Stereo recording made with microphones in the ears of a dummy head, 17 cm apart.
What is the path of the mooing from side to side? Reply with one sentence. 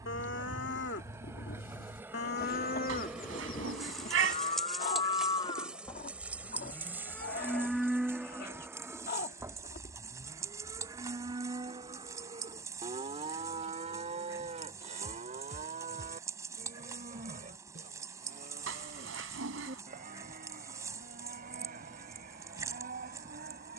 In this clip you hear the mooing move to the right.